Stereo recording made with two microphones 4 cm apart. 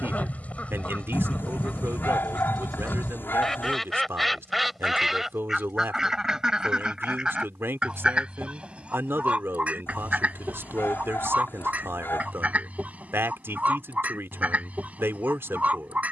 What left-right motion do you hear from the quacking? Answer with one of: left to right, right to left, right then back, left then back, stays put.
left to right.